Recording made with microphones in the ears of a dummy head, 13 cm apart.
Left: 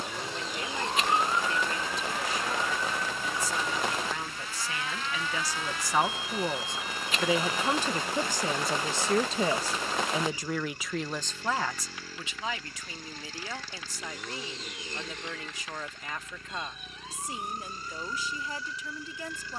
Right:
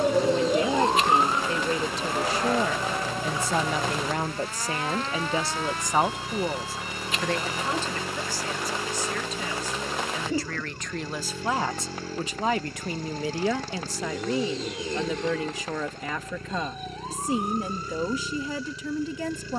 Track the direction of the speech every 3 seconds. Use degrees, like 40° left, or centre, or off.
70° right, 40° right, 10° left, 10° left, 60° right, 70° right, 70° right.